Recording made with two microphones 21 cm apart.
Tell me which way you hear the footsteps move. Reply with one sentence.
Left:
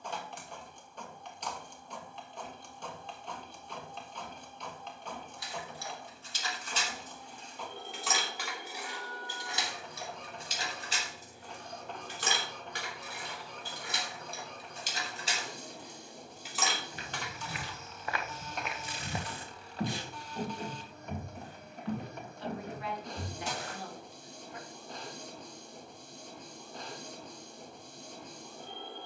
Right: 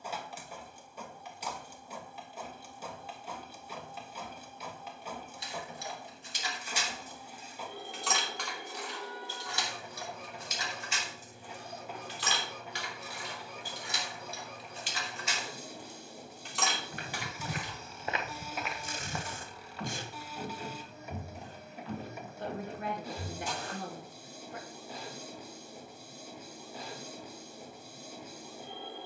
You can hear the footsteps move to the left.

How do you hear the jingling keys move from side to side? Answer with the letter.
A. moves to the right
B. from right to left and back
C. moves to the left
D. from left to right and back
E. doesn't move
B.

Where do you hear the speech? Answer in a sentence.
In this clip you hear the speech on the right.